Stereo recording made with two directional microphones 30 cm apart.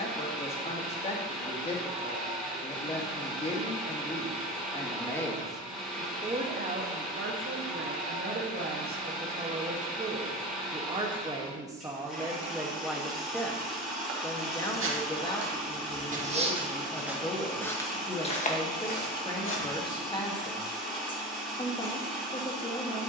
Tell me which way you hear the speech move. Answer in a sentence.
In this clip you hear the speech go right and come back.